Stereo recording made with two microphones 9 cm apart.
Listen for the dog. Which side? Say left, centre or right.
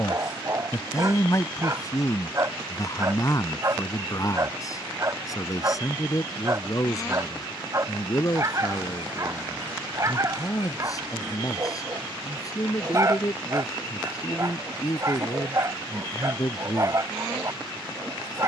right.